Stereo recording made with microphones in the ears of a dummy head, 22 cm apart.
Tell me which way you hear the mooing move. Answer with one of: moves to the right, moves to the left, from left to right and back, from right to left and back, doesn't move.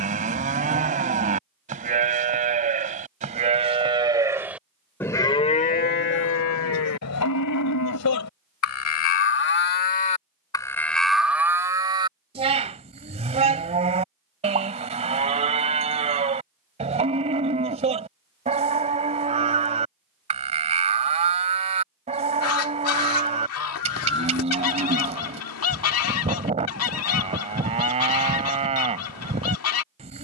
from right to left and back.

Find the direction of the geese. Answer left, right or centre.
left.